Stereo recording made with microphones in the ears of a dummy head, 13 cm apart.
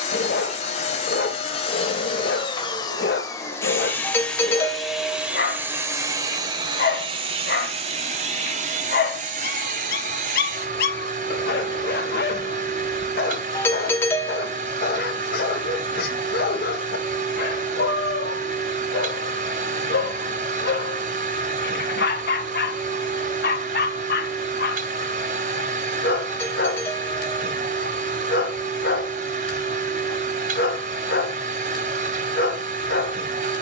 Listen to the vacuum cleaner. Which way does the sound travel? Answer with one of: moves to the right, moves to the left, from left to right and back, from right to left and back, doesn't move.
moves to the right.